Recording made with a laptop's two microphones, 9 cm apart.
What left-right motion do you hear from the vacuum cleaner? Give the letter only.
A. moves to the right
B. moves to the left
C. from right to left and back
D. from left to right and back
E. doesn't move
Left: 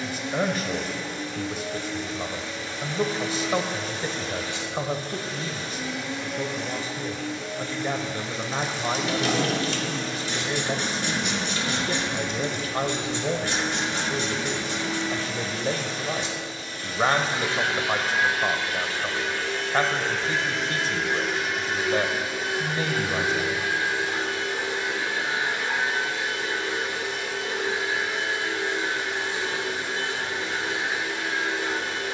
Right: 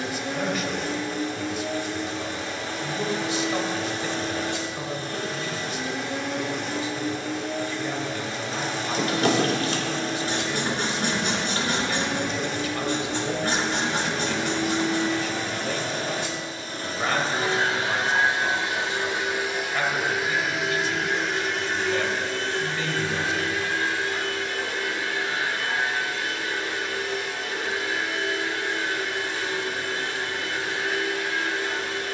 B.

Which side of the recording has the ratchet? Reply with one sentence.
You can hear the ratchet on the right.